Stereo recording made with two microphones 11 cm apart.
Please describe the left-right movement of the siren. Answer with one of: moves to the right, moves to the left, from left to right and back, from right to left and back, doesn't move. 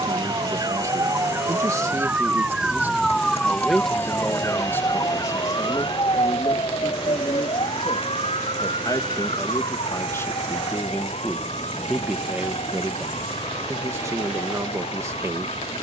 moves to the left.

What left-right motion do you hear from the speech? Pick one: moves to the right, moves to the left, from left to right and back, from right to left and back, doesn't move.
from right to left and back.